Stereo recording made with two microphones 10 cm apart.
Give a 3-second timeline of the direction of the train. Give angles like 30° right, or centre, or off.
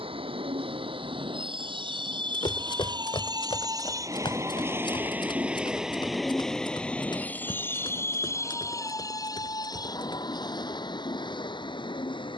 60° right, 30° right, 20° left, 40° left.